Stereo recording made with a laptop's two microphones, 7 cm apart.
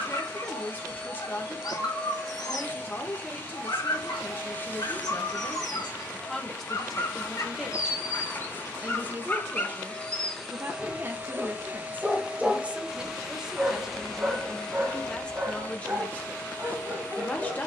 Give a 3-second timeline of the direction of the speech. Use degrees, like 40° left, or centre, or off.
20° left, 20° left, centre, 30° right, 10° right, 20° left.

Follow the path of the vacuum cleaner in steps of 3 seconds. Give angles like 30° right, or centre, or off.
30° left, 30° left, 30° left, centre, centre, 20° left.